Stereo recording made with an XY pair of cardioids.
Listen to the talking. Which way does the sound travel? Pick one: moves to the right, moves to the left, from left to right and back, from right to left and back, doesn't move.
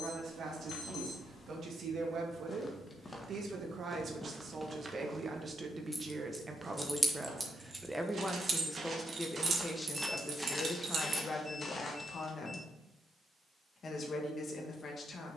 moves to the left.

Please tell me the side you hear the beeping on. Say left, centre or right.
left.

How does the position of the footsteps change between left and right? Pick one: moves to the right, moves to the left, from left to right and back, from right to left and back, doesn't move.
from left to right and back.